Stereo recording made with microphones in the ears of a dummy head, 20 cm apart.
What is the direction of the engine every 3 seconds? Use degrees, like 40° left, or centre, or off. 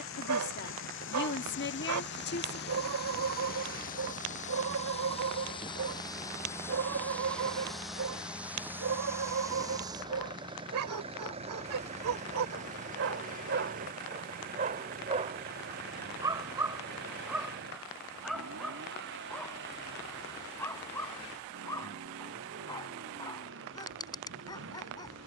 60° left, 30° left, centre, 20° right, 40° right, 50° right, 50° right, 60° right, 60° right.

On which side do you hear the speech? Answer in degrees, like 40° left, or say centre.
50° left.